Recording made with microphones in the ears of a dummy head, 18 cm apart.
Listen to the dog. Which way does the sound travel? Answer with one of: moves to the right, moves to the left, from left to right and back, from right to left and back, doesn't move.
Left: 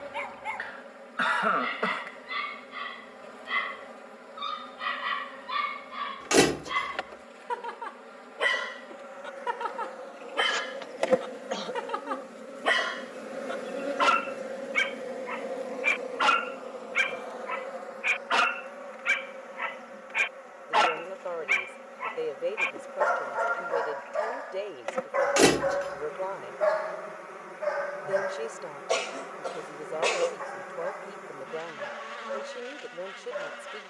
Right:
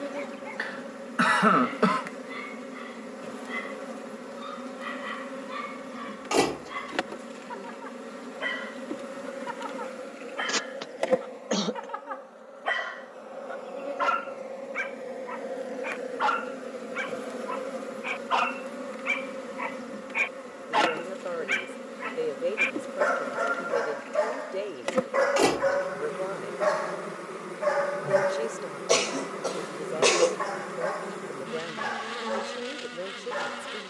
moves to the right.